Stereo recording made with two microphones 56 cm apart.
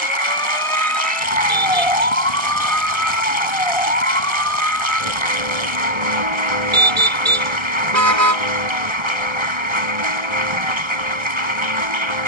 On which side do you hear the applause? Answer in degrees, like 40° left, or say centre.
60° right.